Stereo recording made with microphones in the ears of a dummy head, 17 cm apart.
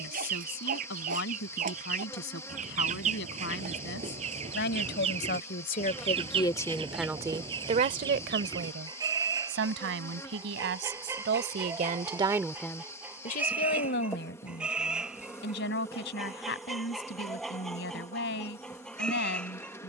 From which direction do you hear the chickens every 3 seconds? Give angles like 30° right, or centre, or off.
40° right, 30° right, 20° right, 20° right, 10° right, centre, centre.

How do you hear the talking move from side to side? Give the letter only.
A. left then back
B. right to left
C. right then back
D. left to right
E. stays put
C.